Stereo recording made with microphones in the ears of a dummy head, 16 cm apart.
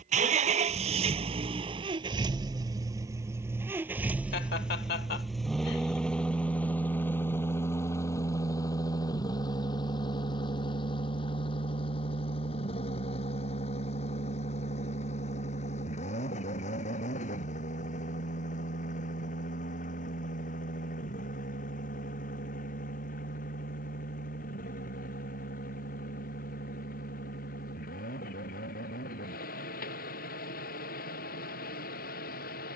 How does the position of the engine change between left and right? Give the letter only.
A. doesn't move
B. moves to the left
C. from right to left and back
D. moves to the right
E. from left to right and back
B.